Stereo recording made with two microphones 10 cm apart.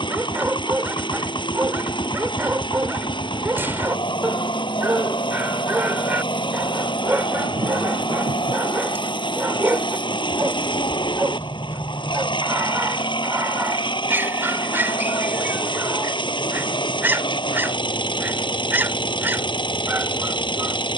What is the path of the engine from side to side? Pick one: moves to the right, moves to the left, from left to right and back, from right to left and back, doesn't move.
doesn't move.